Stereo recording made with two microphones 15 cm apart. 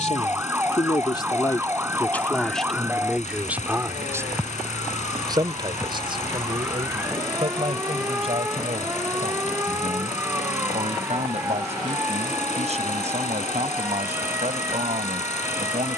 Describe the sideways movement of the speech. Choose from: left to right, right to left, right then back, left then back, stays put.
left to right.